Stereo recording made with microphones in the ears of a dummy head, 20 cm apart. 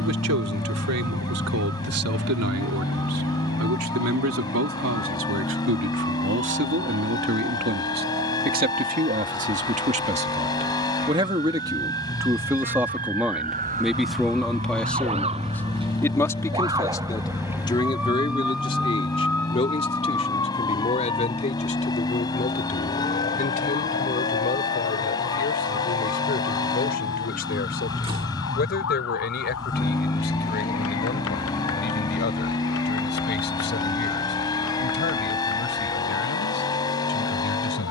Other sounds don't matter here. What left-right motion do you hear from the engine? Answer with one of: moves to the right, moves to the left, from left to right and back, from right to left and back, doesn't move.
doesn't move.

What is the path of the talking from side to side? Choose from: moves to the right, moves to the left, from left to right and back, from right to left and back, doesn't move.
moves to the left.